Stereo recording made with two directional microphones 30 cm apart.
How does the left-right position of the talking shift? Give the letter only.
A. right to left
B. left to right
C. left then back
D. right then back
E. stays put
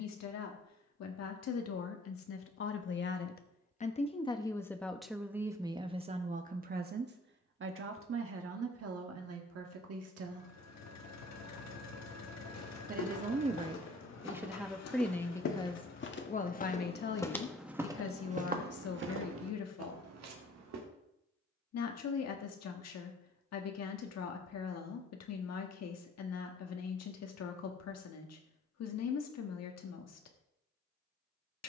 D.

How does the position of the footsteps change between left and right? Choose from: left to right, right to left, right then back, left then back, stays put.
left to right.